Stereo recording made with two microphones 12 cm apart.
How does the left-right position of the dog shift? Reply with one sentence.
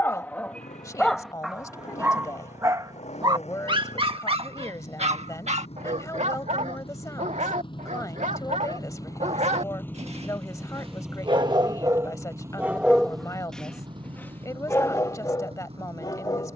In this clip you hear the dog go right and come back.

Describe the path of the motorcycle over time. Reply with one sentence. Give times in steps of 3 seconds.
You can hear the motorcycle on the left from 0 s, in the centre from 9 s and on the right from 12 s.